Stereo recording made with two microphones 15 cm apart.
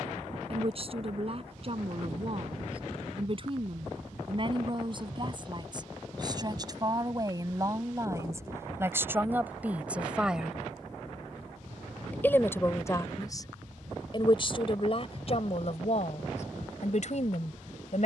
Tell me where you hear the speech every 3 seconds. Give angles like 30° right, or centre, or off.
40° right, 40° right, 20° right, 10° right, 30° left, 50° left.